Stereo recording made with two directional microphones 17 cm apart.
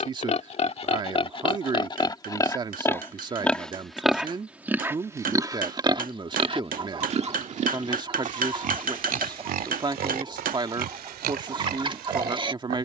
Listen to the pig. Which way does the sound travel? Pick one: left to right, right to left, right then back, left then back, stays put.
left to right.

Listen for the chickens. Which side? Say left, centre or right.
right.